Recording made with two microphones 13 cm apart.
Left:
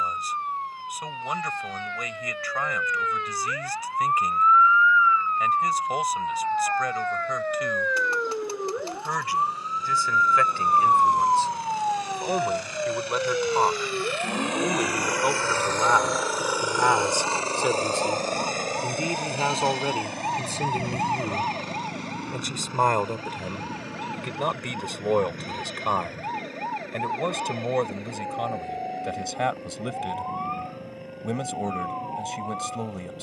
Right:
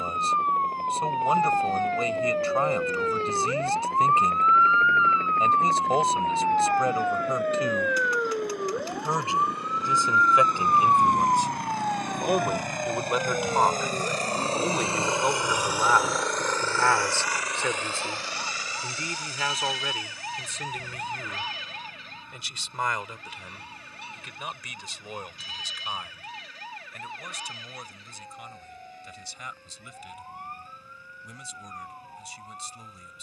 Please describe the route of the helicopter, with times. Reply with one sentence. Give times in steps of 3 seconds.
In this clip you hear the helicopter on the right from 0 s, in the centre from 15 s and on the left from 18 s.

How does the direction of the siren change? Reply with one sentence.
You can hear the siren travel towards the left.